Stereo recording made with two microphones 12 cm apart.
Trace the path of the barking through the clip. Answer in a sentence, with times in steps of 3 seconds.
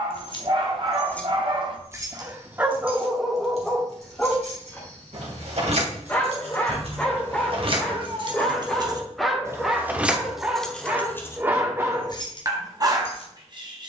In this clip you hear the barking on the right from 0 s, in the centre from 3 s and on the right from 12 s.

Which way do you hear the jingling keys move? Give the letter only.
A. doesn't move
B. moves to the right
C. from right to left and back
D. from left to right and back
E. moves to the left
D.